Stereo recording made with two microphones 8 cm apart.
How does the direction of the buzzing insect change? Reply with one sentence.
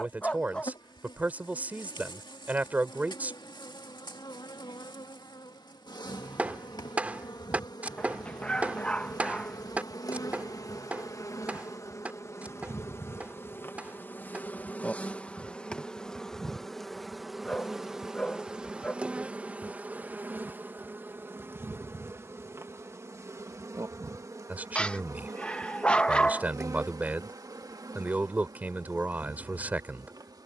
You can hear the buzzing insect move to the right.